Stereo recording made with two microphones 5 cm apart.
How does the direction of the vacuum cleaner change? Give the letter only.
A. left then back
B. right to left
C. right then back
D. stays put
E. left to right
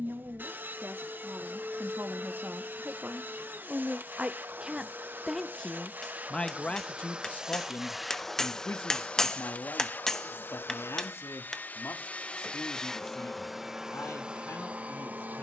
A.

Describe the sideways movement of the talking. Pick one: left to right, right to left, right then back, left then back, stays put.
right to left.